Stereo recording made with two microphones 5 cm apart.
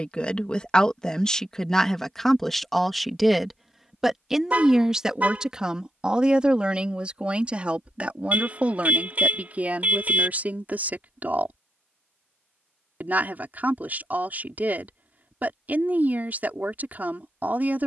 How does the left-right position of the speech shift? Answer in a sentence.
You can hear the speech move to the right.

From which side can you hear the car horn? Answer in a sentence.
In this clip you hear the car horn on the right.